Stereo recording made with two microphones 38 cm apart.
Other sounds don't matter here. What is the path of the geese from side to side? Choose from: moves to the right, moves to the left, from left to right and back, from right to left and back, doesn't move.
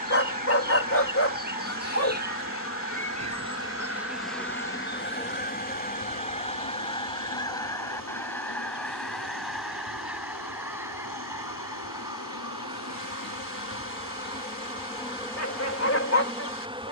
moves to the right.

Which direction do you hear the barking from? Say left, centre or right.
left.